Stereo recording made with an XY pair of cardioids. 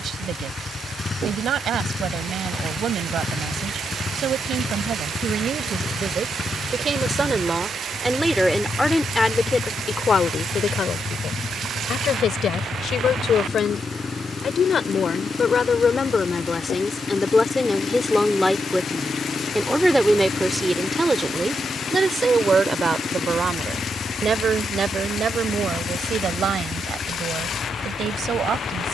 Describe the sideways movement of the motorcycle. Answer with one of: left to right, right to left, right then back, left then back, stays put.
stays put.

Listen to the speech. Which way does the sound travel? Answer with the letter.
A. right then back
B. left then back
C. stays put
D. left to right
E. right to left
B.